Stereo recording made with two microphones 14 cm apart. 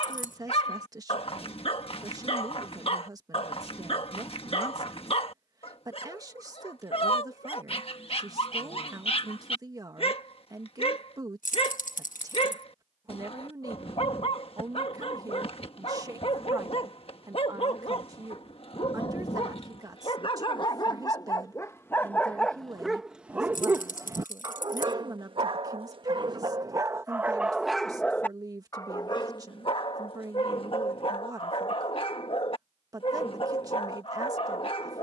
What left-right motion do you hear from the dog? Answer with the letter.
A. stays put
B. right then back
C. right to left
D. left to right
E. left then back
B.